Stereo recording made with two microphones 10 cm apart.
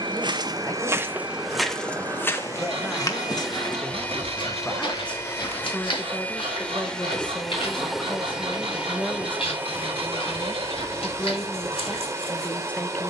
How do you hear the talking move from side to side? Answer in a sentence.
In this clip you hear the talking stay in one place.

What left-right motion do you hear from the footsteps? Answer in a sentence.
In this clip you hear the footsteps travel towards the left.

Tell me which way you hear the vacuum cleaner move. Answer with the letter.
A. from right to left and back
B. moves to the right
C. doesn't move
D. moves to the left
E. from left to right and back
A.